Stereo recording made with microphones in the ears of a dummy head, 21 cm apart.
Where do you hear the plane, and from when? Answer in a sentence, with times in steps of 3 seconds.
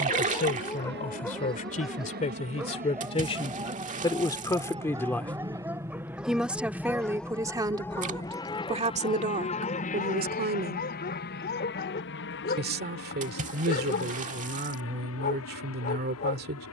You can hear the plane on the right from 0 s, in the centre from 6 s and on the left from 9 s.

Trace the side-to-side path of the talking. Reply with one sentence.
In this clip you hear the talking move from left to right.